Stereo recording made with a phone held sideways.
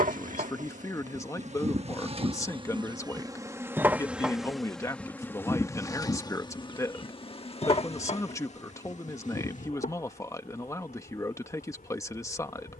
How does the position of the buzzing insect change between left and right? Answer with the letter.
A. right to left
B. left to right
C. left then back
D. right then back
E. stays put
A.